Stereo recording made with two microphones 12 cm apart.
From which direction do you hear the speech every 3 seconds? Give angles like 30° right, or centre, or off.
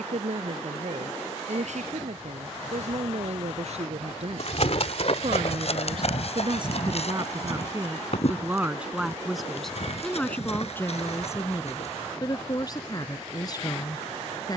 70° right, 60° right, 30° right, 10° left, 30° left.